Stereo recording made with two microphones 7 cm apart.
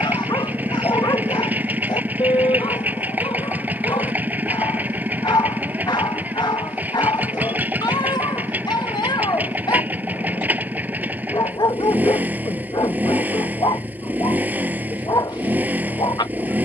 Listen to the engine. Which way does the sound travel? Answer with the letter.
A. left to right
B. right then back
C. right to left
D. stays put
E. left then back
D.